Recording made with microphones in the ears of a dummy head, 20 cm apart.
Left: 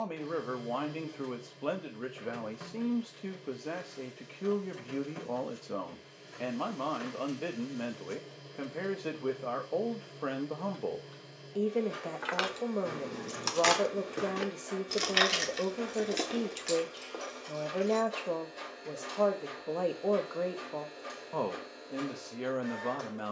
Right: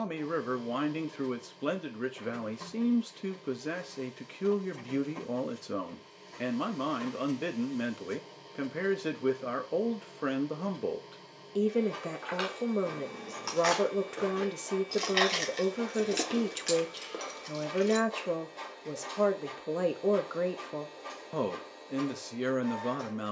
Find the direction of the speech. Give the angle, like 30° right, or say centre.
20° right.